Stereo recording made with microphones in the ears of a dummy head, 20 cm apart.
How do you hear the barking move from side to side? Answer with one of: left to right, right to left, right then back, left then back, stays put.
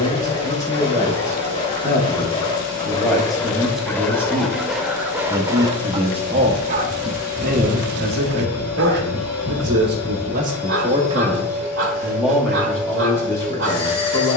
left to right.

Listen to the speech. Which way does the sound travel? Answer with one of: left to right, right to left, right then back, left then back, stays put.
right then back.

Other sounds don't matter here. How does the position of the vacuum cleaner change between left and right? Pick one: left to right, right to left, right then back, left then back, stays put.
stays put.